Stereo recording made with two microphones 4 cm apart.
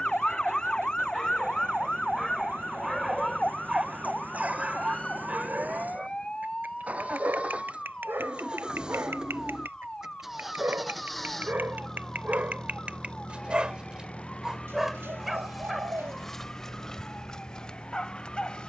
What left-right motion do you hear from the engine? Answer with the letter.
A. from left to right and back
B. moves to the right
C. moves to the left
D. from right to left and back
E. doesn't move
C.